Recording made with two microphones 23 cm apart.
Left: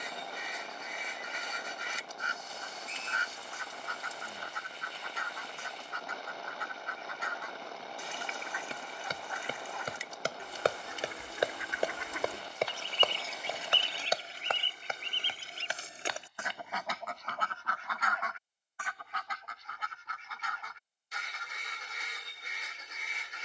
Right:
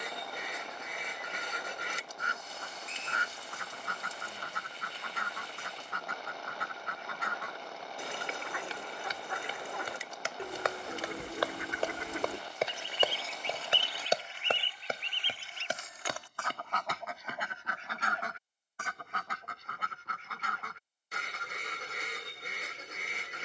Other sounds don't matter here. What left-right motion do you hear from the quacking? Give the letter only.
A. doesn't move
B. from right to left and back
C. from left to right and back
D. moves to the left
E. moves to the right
B.